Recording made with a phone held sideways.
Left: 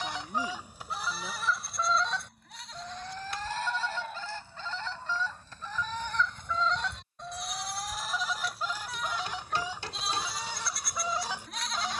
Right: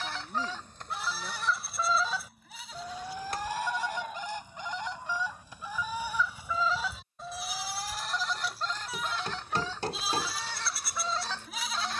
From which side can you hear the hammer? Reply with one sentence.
You can hear the hammer on the right.